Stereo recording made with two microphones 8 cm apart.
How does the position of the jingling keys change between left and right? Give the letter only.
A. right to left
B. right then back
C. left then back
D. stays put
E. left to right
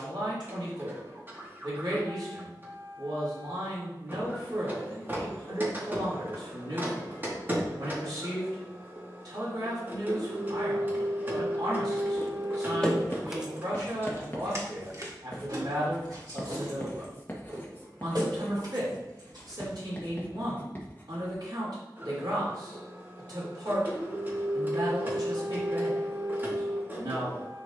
E.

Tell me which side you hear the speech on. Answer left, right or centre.
right.